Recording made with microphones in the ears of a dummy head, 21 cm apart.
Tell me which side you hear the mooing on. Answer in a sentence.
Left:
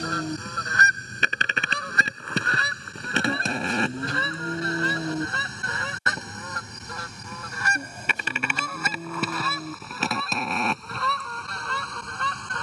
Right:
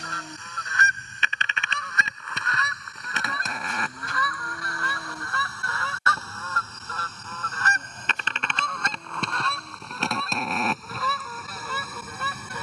You can hear the mooing on the left.